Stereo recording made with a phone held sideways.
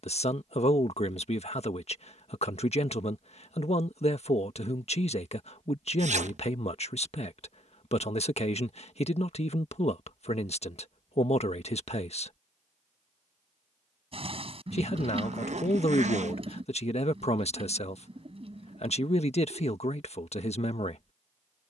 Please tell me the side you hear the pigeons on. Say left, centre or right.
right.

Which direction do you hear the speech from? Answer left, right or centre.
left.